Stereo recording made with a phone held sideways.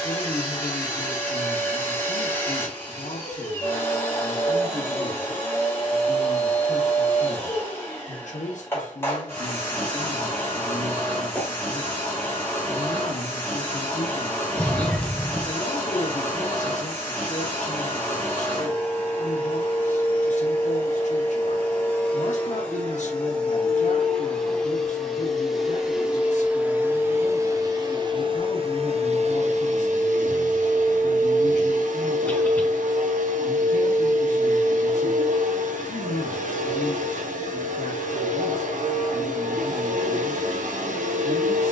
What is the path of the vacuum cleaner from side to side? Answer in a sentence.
In this clip you hear the vacuum cleaner move from left to right.